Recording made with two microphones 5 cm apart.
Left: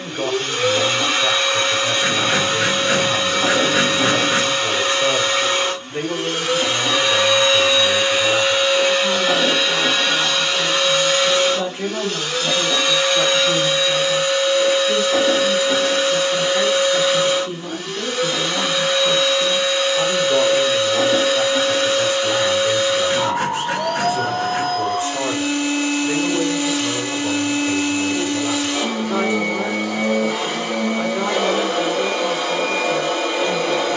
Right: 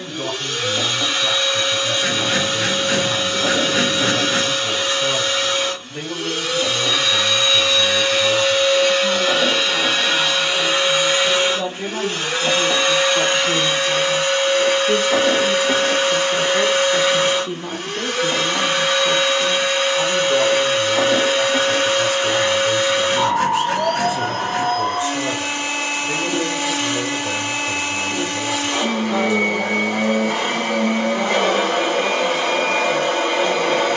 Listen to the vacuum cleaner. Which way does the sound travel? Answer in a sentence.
You can hear the vacuum cleaner move to the right.